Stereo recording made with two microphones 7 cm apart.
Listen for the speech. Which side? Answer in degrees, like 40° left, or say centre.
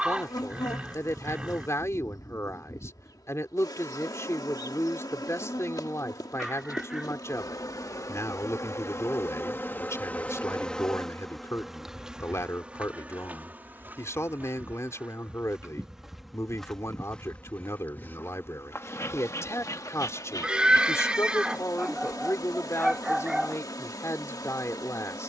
40° left.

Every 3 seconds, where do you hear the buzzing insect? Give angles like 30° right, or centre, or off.
60° left, 60° left, 60° left, 20° left, 20° right, centre, 50° left, 60° left, 60° left.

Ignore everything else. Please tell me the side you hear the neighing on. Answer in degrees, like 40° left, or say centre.
10° right.